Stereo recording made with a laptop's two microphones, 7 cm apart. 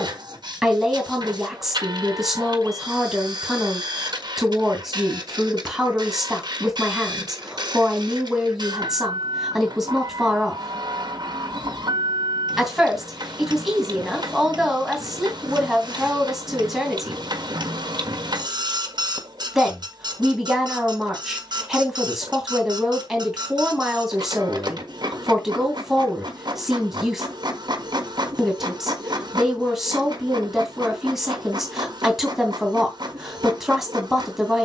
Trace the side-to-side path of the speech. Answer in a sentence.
You can hear the speech stay put.